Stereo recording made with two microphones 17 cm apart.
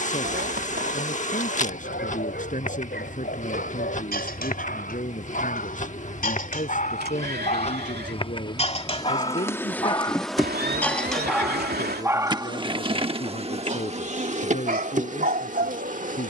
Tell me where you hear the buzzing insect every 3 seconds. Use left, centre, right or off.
left, left, left, centre, right, right.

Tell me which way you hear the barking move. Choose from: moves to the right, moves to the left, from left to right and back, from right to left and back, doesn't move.
moves to the right.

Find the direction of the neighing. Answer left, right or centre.
right.